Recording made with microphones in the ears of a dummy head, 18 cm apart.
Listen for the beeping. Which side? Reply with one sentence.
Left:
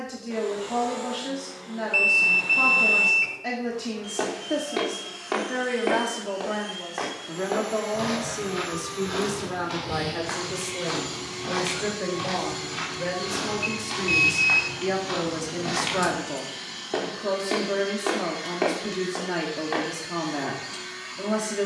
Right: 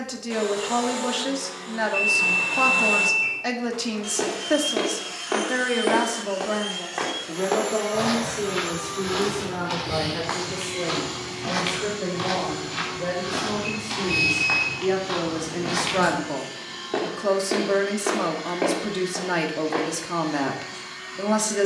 In this clip you hear the beeping on the left.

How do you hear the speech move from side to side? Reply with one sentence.
In this clip you hear the speech go left and come back.